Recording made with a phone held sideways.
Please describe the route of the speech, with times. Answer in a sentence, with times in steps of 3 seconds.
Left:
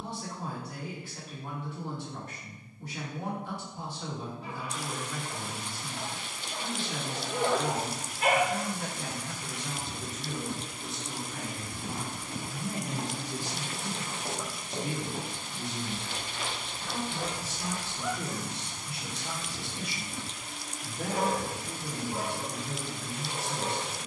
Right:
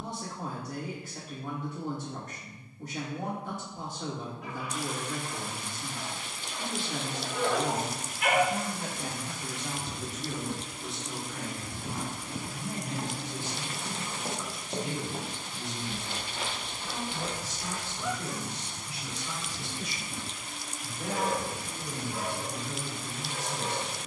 You can hear the speech on the right from 0 s, in the centre from 9 s and on the left from 12 s.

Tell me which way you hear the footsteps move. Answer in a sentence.
You can hear the footsteps move from left to right and back again.